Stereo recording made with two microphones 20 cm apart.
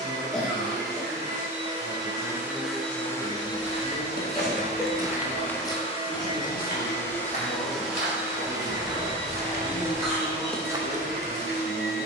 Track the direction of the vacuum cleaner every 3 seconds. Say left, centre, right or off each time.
right, left, centre, right.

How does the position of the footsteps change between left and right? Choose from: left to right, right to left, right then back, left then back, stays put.
left then back.